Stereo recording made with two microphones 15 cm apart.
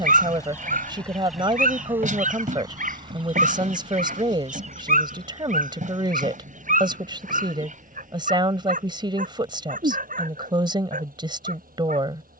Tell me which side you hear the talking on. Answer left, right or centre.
right.